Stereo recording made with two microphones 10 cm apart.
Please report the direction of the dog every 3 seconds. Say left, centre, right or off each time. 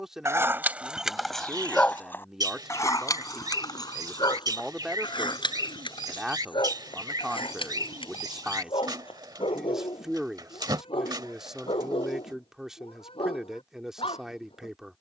centre, left, left, left, left.